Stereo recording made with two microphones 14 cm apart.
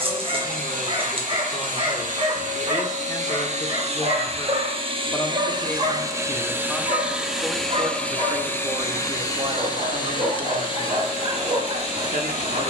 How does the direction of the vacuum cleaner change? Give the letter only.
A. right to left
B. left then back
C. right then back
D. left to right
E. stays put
A.